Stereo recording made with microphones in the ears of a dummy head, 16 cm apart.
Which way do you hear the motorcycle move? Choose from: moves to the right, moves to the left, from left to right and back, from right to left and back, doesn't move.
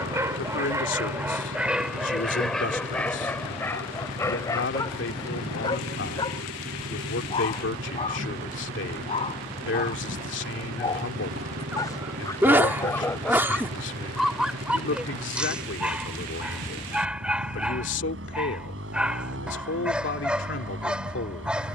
doesn't move.